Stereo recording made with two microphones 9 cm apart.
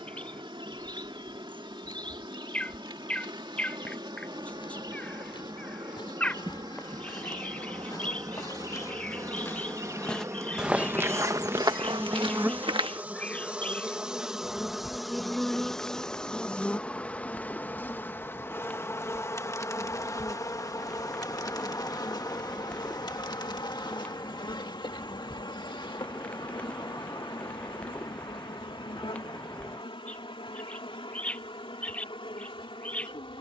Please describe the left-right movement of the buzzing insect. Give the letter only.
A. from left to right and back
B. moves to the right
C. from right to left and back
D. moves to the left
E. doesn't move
D.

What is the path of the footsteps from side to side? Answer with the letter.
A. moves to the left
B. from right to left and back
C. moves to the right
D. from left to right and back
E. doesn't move
C.